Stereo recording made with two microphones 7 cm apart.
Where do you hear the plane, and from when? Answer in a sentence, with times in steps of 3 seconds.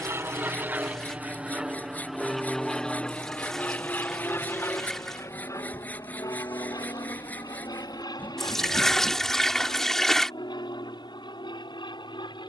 You can hear the plane in the centre from 0 s and on the left from 3 s.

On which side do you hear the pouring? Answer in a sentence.
You can hear the pouring in the centre.